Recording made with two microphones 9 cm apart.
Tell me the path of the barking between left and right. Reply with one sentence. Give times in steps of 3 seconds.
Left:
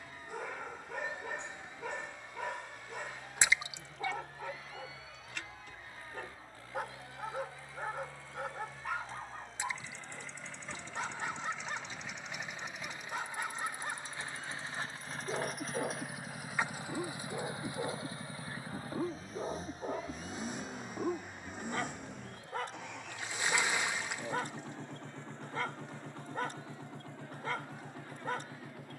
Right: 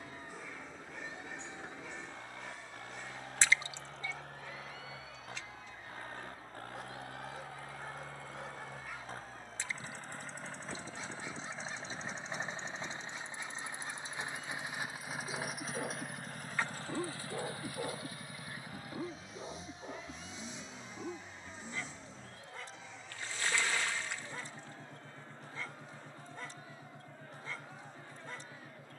You can hear the barking on the left from 0 s, in the centre from 15 s and on the left from 18 s.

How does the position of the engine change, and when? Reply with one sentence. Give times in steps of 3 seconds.
In this clip you hear the engine on the right from 0 s, in the centre from 15 s and on the left from 18 s.